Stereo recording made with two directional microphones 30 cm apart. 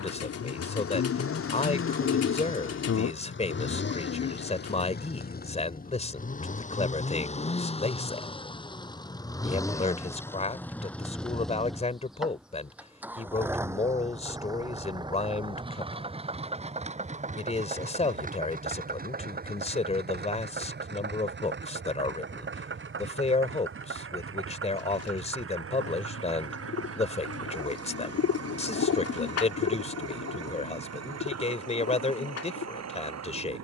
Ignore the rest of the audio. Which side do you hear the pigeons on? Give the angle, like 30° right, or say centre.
50° left.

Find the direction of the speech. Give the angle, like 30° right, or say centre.
20° left.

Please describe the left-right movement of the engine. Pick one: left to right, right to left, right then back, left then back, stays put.
left to right.